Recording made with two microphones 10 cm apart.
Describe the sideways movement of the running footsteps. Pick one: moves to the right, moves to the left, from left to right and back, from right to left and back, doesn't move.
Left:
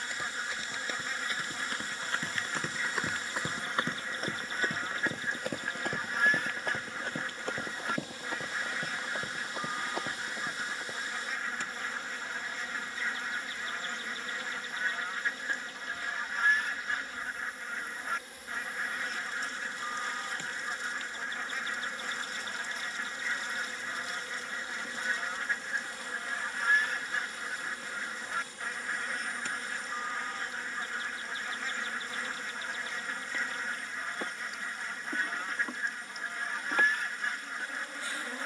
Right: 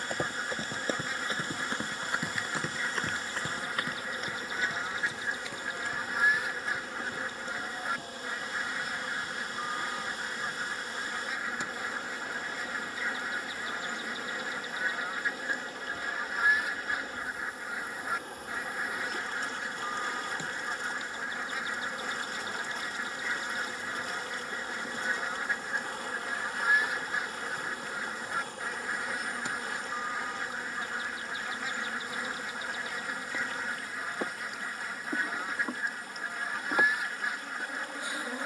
moves to the left.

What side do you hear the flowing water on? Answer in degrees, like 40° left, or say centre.
60° right.